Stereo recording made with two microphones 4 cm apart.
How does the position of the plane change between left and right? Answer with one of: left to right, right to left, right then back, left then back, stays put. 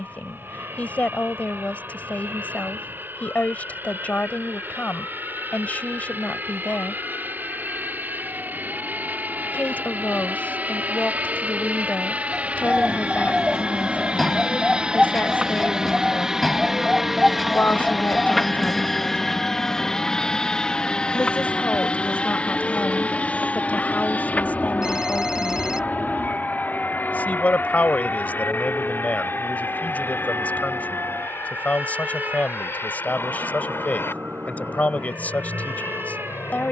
right to left.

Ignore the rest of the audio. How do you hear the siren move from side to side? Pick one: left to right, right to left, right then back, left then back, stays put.
left to right.